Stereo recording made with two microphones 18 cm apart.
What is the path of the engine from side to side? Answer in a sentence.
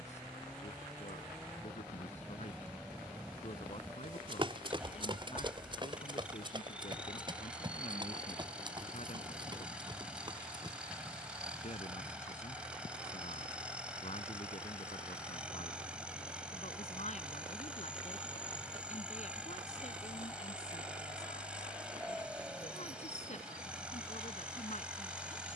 You can hear the engine stay put.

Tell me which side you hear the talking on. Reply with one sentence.
In this clip you hear the talking on the left.